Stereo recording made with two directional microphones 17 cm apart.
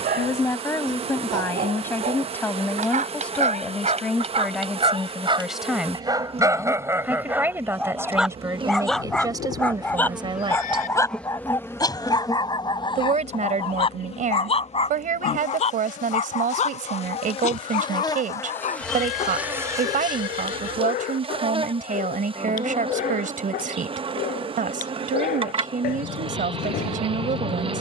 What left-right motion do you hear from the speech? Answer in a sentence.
In this clip you hear the speech move to the right.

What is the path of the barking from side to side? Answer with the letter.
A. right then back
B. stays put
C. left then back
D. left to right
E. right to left
E.